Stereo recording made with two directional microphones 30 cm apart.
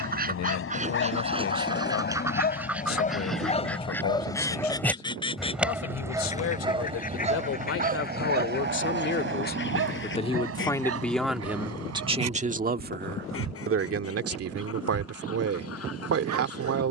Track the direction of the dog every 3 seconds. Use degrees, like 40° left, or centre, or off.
40° left, 10° left, 20° right, 50° right, 60° right, 70° right.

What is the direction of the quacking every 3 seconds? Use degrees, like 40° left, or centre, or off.
20° right, 10° left, 30° left, 40° left, 50° left, 50° left.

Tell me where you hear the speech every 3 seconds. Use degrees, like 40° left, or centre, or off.
60° left, 60° left, 50° left, 10° left, 40° right, 50° right.